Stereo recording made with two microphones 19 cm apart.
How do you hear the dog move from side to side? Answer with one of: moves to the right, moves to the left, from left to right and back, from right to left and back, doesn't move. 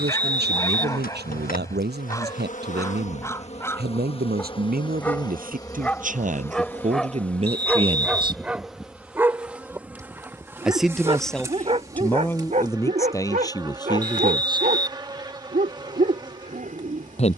moves to the right.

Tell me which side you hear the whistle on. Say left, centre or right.
right.